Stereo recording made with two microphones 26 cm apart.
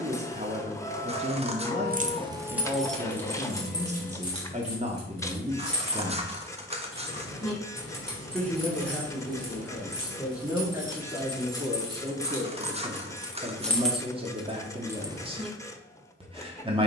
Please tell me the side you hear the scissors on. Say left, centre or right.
right.